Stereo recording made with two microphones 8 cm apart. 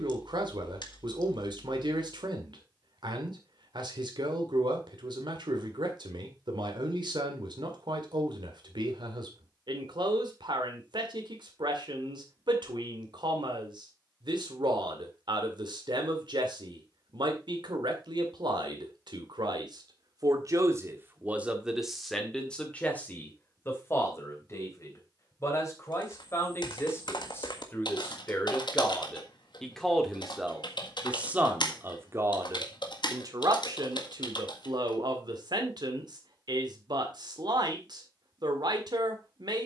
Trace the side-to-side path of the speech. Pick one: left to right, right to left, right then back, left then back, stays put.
left then back.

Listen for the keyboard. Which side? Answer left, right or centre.
left.